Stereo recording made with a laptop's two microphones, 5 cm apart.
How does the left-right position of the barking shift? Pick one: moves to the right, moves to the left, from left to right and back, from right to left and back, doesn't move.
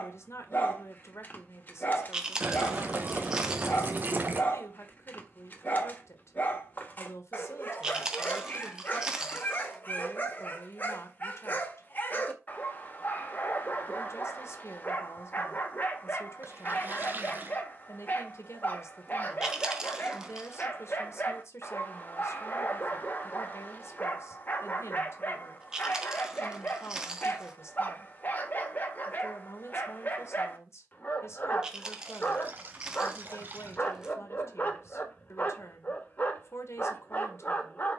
doesn't move.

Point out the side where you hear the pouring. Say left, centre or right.
right.